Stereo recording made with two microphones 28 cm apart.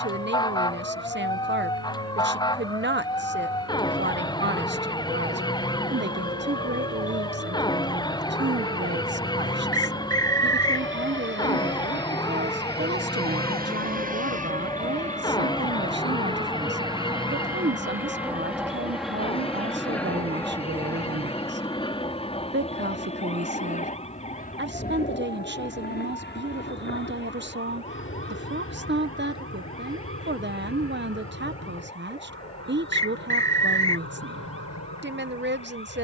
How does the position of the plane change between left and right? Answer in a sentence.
You can hear the plane travel towards the left.